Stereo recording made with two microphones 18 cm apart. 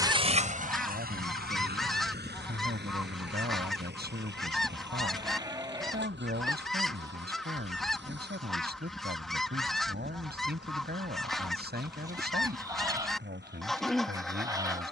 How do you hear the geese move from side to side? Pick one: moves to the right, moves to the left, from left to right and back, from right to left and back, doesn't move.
doesn't move.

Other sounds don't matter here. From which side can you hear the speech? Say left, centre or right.
right.